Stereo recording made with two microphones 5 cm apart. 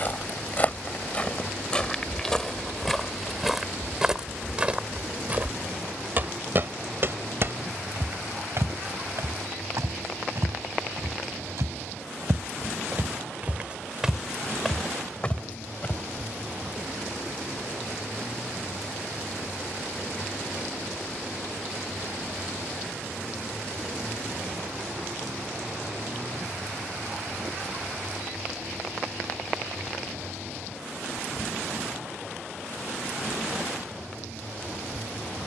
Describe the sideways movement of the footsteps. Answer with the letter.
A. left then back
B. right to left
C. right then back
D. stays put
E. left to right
C.